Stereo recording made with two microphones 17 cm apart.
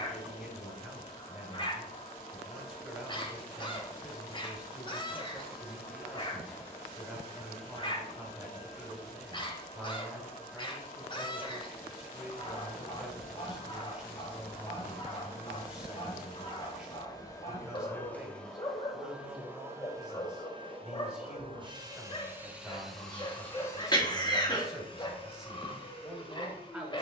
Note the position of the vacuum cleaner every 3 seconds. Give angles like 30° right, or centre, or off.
40° left, 40° left, 40° left, 40° left, 40° left, 30° left, 10° right, 10° right, 30° left.